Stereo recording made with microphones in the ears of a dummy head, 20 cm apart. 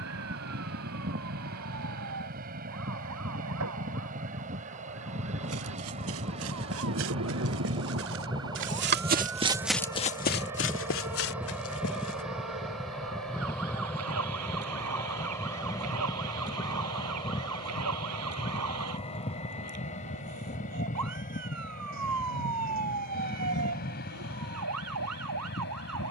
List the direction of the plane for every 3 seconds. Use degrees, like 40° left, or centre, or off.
50° right, 40° right, 20° right, 10° right, centre, 20° left, 30° left, 40° left, 40° left.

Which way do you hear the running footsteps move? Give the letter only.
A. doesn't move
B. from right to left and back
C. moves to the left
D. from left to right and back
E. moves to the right
C.